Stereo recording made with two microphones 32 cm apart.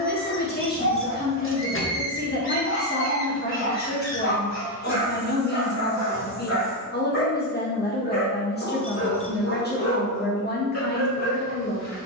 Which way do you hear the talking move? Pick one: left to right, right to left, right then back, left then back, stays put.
stays put.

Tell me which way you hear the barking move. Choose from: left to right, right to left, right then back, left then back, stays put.
stays put.